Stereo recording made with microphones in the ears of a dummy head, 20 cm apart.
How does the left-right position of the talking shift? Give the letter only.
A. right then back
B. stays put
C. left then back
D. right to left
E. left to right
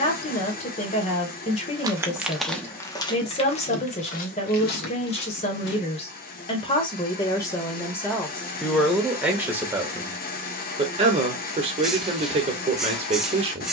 E.